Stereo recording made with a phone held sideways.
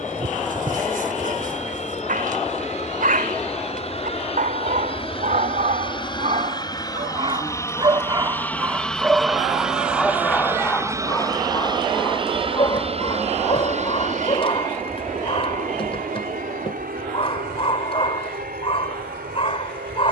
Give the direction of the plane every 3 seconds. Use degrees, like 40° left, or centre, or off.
60° left, 40° left, 20° left, 10° right, 40° right, 60° right, 70° right.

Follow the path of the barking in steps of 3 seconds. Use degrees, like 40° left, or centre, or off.
70° right, 60° right, 30° right, 10° left, 40° left, 40° left, 40° left.